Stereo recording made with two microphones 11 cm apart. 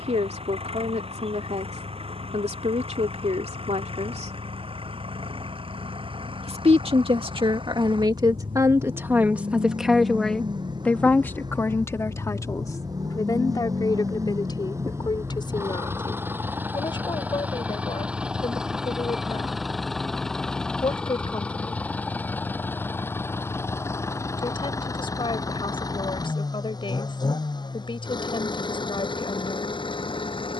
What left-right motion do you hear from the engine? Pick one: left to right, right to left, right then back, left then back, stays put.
right to left.